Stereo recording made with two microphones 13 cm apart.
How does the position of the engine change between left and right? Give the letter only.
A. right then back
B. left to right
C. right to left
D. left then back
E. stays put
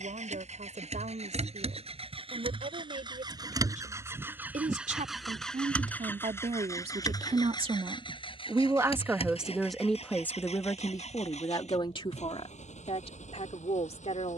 C.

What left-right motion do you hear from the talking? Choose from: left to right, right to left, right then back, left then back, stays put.
right to left.